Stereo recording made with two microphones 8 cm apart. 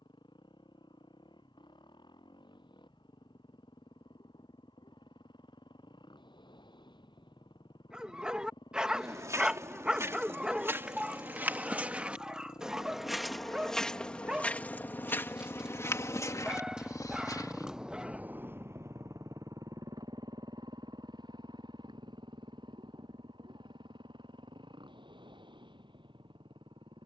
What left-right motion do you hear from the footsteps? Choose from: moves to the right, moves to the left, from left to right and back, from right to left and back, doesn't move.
moves to the left.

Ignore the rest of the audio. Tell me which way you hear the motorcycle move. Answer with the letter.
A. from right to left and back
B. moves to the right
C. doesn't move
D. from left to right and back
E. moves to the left
B.